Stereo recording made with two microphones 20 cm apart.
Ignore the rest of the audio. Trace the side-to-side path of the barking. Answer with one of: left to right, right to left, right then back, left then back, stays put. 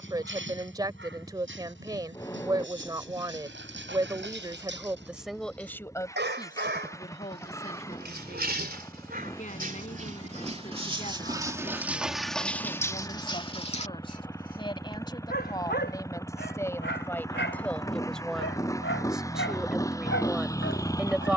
right to left.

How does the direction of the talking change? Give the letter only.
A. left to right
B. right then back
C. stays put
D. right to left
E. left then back
E.